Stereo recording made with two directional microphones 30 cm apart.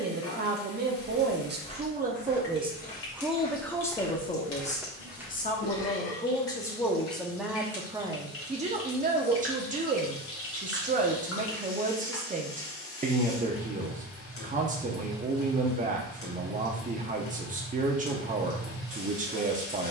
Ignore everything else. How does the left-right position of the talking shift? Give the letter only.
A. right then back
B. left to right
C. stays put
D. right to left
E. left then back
E.